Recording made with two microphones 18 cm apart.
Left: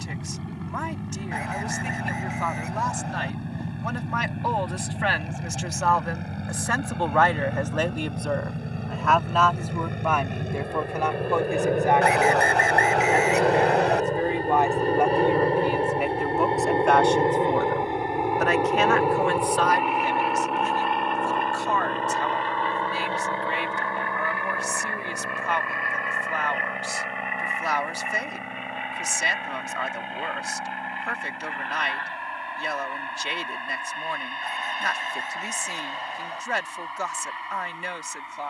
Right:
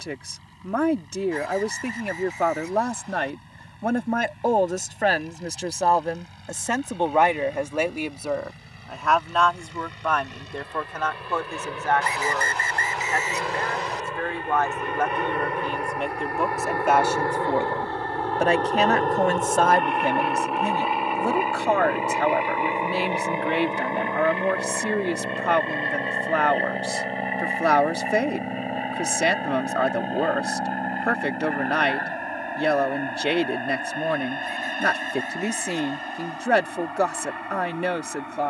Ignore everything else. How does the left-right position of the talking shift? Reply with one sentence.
You can hear the talking go left and come back.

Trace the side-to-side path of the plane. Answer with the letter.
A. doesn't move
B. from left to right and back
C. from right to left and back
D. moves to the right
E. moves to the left
D.